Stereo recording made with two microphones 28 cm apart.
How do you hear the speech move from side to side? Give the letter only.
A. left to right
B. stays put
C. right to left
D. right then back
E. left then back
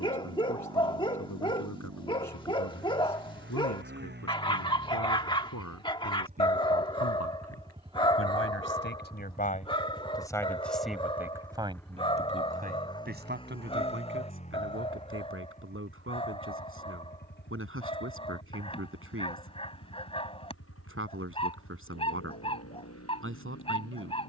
A.